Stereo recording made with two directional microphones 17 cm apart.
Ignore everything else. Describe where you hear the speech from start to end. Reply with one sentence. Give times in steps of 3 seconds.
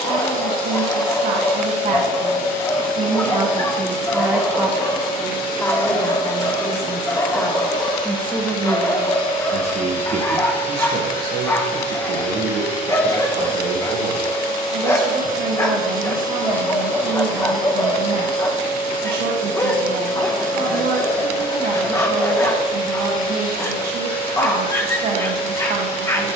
You can hear the speech on the right from 0 s, in the centre from 3 s and on the right from 9 s.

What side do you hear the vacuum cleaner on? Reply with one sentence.
You can hear the vacuum cleaner on the left.